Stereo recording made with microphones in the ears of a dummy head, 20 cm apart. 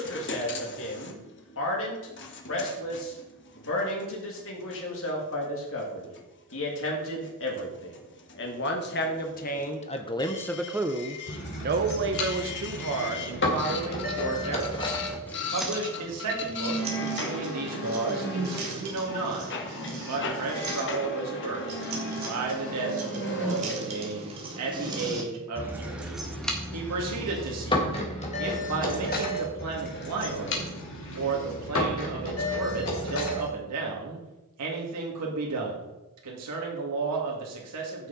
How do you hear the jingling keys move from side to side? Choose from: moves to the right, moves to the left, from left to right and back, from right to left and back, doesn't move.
from left to right and back.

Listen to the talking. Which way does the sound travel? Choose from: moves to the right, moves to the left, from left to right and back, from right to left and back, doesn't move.
moves to the right.